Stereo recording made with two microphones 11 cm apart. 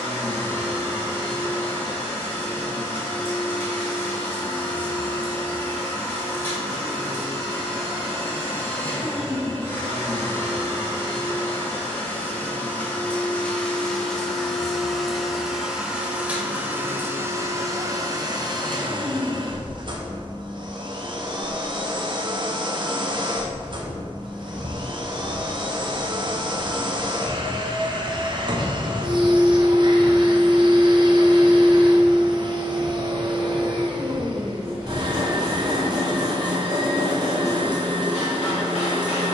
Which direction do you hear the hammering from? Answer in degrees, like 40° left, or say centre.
70° left.